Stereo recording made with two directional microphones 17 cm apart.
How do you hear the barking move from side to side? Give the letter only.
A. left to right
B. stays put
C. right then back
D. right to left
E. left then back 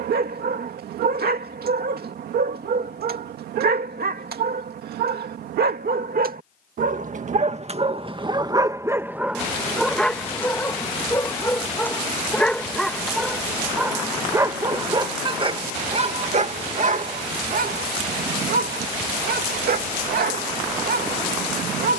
E.